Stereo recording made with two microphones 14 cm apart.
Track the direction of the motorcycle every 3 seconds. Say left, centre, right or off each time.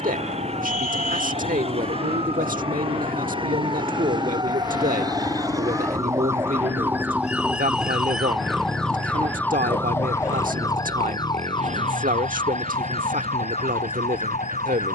left, left, centre, right, right.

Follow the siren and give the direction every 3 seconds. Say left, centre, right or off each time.
right, right, centre, left, left.